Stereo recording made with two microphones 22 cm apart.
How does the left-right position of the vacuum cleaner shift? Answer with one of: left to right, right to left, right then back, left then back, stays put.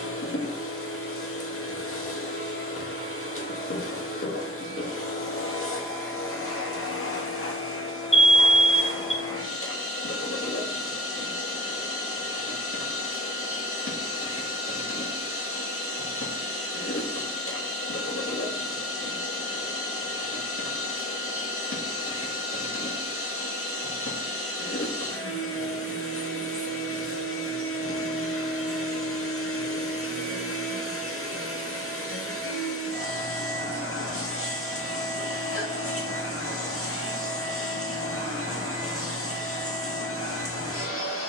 stays put.